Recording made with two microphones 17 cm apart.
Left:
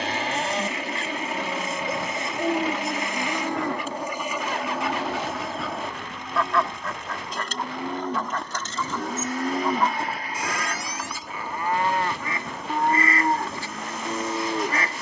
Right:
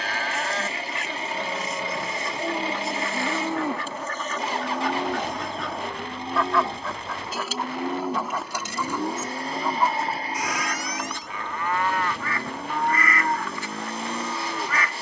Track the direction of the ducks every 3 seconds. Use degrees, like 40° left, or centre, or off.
30° left, 10° left, 10° right, centre, 30° left.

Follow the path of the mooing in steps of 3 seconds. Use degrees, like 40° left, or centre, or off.
10° left, 20° right, 20° right, 30° left, 30° left.